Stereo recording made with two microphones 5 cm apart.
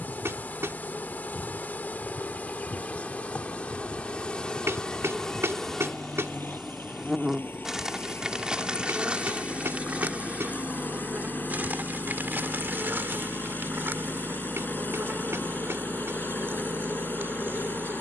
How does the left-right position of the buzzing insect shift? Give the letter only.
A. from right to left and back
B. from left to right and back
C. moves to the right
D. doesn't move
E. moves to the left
C.